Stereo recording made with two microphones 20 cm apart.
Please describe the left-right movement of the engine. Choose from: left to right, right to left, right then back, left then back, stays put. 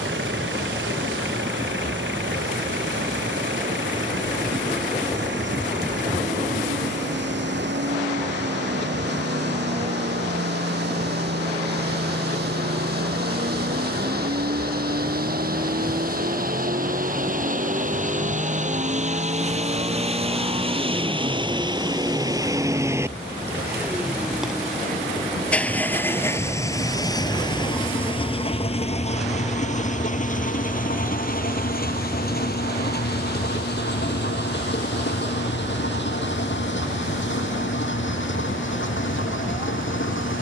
right to left.